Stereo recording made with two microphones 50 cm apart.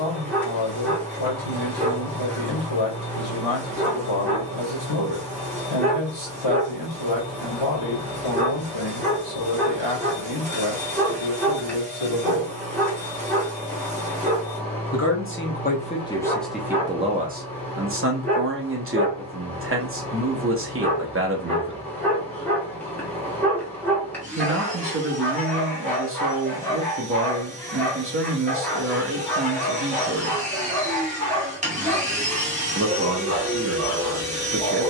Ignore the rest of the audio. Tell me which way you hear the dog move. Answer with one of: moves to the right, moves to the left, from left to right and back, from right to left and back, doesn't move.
doesn't move.